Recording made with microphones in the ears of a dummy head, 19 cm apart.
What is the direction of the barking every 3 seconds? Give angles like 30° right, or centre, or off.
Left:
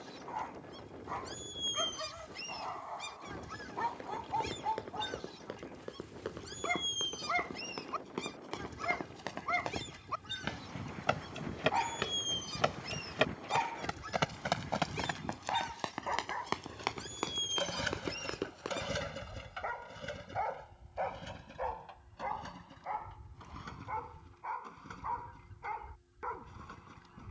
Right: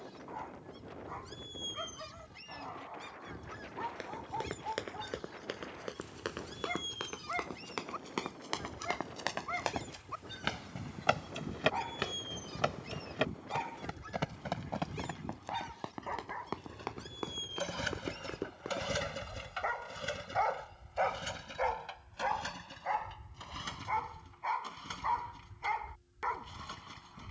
30° left, 30° left, 30° left, 30° left, 30° left, 20° left, 20° right, 60° right, 80° right.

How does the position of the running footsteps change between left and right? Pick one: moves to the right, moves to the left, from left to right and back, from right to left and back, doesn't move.
moves to the left.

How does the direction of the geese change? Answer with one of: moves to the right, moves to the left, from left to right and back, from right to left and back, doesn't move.
doesn't move.